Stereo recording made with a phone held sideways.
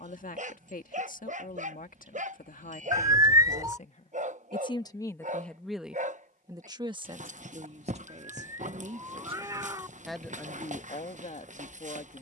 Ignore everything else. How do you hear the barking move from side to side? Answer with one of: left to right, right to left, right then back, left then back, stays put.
stays put.